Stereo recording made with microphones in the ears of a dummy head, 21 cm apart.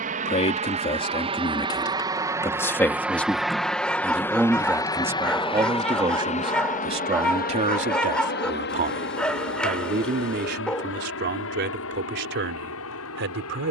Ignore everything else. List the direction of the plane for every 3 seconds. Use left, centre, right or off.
right, centre, left, left, left.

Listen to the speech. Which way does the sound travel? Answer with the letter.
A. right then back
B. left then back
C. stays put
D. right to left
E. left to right
E.